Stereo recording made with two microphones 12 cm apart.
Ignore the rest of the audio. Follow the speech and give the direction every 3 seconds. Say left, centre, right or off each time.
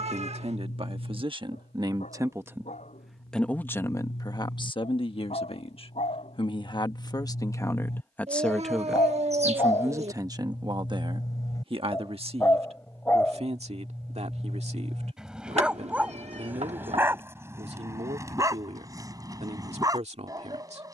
right, left, left, right, right, right, right.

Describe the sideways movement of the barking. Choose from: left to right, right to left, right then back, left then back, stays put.
left to right.